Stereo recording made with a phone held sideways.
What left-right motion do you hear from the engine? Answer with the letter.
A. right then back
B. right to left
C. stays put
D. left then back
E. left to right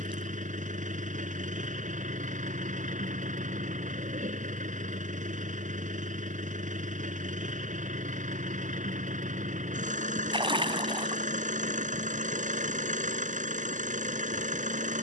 C.